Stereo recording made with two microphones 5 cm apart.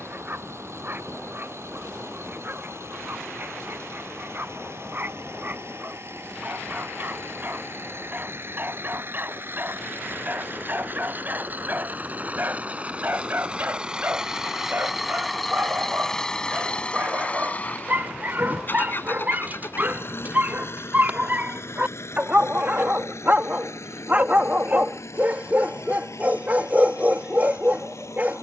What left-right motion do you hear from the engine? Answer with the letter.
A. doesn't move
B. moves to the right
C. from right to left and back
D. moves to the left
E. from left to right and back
D.